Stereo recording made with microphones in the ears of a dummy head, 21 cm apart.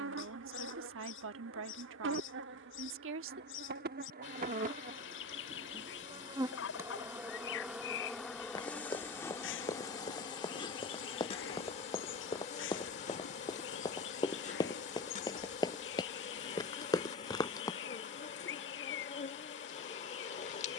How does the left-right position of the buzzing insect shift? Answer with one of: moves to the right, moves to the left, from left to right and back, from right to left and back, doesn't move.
moves to the left.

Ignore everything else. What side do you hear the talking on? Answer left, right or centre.
right.